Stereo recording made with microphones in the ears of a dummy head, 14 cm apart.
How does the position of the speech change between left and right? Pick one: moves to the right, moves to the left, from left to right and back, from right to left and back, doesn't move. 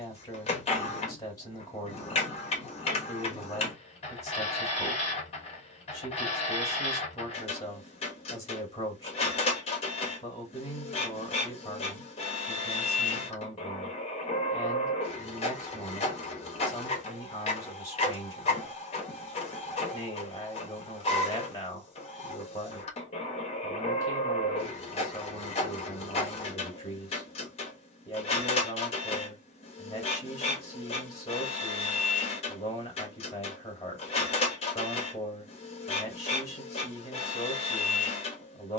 doesn't move.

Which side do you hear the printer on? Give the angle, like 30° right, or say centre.
40° left.